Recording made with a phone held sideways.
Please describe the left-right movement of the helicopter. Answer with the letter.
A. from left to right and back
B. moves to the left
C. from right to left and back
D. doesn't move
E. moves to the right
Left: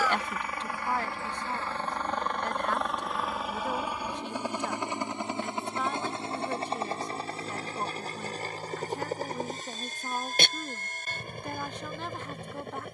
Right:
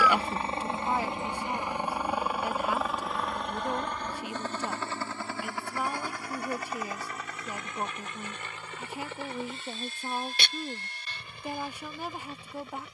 B.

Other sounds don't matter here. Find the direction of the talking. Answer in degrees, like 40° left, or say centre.
10° right.